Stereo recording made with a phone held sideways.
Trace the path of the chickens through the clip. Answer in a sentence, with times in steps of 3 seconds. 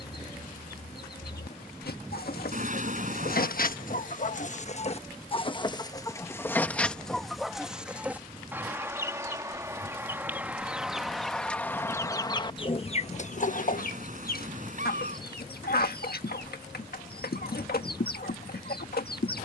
You can hear the chickens on the left from 0 s, in the centre from 6 s and on the left from 12 s.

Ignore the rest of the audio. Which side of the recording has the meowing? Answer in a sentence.
In this clip you hear the meowing on the right.